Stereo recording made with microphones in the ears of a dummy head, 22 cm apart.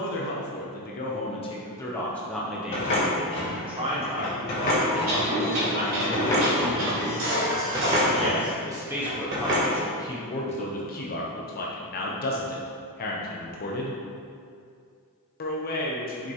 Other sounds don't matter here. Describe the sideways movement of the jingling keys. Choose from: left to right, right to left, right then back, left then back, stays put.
left to right.